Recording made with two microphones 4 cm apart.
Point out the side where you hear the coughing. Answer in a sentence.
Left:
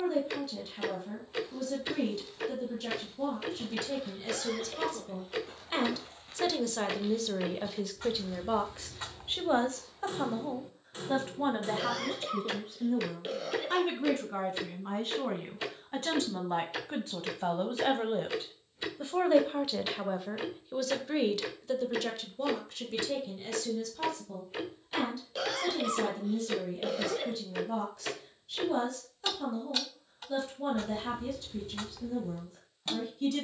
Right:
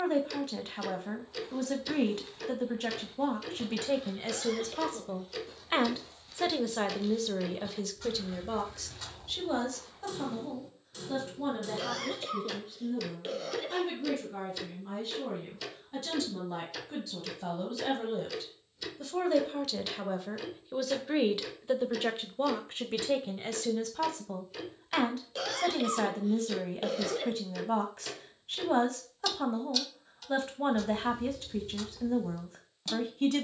You can hear the coughing in the centre.